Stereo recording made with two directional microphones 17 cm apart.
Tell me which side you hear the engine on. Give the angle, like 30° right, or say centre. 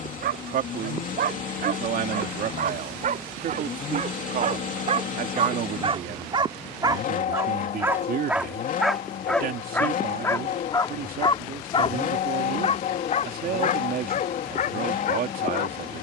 50° left.